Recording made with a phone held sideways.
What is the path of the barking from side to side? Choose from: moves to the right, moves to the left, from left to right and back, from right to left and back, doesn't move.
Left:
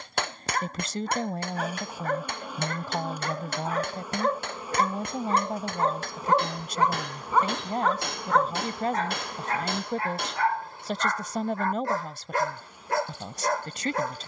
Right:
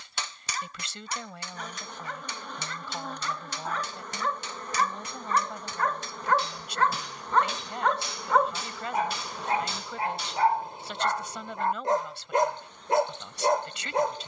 moves to the right.